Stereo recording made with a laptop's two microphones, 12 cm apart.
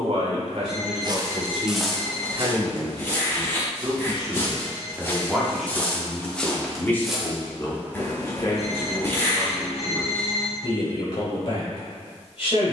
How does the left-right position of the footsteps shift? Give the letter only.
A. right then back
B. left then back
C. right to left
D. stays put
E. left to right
B.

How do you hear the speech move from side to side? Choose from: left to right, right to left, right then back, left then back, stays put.
right to left.